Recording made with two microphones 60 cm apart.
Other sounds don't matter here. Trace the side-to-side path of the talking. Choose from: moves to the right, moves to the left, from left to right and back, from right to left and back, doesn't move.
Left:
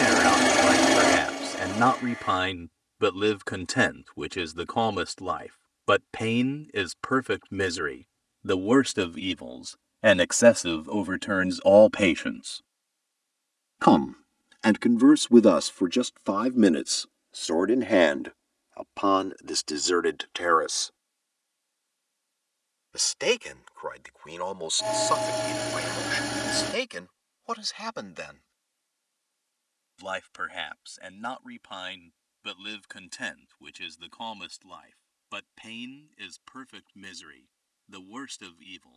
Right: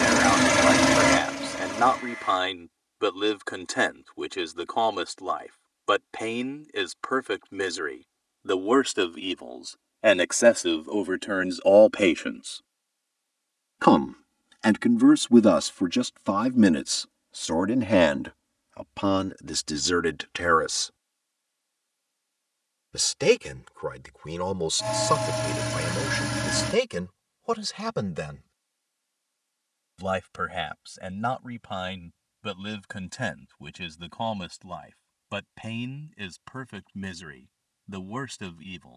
moves to the right.